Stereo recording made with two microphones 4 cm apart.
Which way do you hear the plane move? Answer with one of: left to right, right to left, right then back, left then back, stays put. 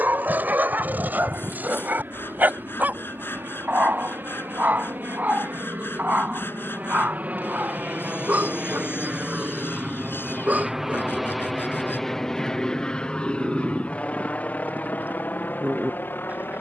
right to left.